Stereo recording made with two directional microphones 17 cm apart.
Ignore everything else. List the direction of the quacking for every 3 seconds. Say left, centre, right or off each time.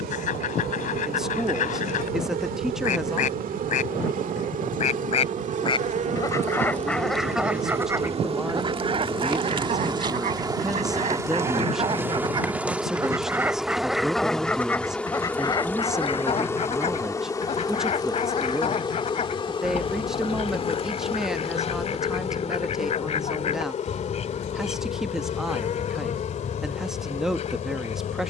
left, left, centre, right, centre, left, left, left, left, left.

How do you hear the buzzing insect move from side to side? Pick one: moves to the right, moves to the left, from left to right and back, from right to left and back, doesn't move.
moves to the left.